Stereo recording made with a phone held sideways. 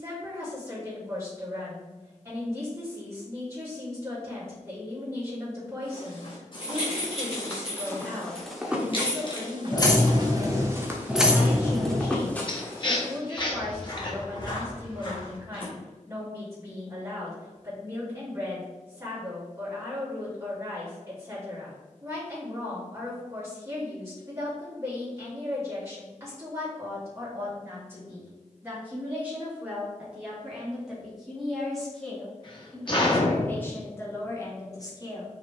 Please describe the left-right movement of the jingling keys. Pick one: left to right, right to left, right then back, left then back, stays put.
left to right.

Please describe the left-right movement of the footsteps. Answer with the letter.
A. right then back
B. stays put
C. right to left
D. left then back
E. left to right
A.